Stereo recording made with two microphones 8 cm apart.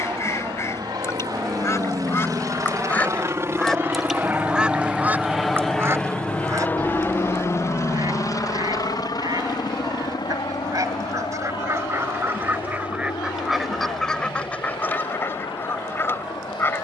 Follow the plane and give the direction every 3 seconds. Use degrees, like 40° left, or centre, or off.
50° right, 20° right, 30° left, 60° left, 70° left, 70° left.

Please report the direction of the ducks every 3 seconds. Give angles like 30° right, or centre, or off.
40° left, 10° right, 50° right, 50° right, centre, 30° left.